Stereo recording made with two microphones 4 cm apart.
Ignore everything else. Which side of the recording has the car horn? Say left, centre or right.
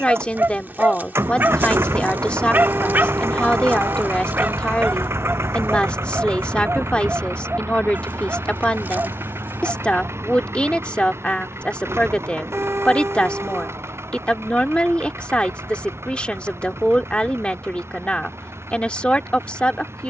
right.